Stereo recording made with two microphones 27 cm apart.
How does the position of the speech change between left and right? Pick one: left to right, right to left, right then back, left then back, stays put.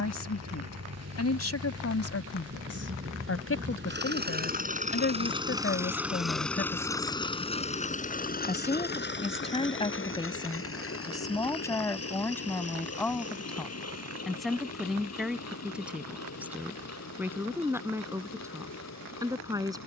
left to right.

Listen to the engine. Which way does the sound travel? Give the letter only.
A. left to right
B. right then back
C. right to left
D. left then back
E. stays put
C.